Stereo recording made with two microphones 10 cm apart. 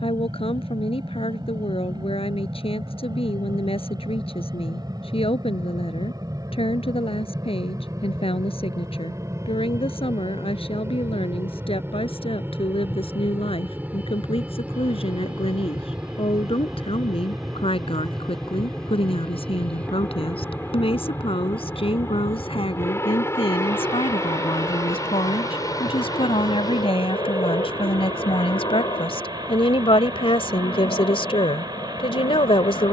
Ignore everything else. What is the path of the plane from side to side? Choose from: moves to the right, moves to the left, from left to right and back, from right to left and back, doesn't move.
moves to the left.